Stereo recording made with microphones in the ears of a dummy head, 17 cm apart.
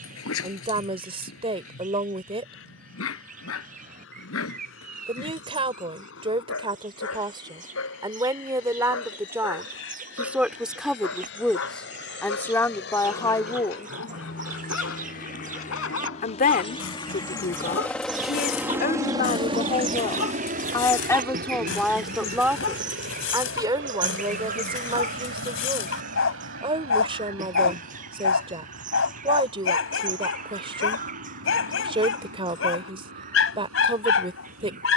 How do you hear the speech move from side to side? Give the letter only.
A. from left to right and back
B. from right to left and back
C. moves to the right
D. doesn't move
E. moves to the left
B.